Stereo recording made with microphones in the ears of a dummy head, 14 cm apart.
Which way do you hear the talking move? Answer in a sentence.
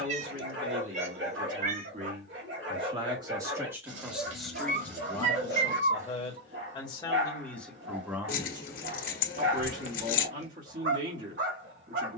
You can hear the talking move from right to left and back again.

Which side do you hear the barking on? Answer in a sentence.
In this clip you hear the barking on the right.